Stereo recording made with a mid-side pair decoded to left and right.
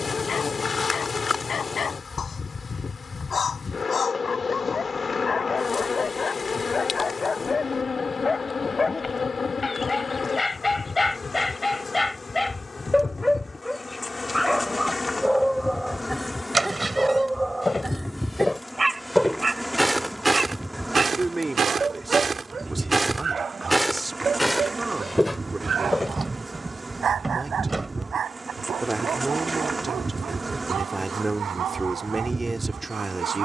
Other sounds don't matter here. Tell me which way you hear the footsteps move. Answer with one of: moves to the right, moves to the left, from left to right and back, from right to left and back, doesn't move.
from left to right and back.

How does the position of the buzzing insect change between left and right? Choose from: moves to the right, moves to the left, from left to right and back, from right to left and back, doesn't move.
moves to the right.